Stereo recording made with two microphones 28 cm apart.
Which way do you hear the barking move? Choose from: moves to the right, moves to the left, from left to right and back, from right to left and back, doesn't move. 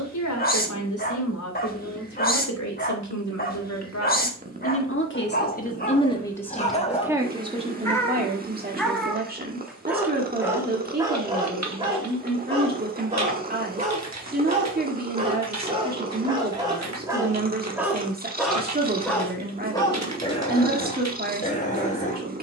from left to right and back.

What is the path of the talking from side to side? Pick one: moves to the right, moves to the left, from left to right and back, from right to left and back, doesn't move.
moves to the right.